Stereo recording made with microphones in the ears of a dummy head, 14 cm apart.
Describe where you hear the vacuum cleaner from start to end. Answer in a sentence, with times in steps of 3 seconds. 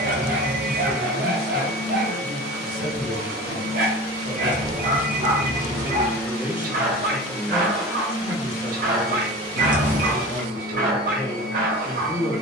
You can hear the vacuum cleaner on the right from 0 s, in the centre from 6 s and on the right from 9 s.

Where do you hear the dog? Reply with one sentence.
You can hear the dog on the right.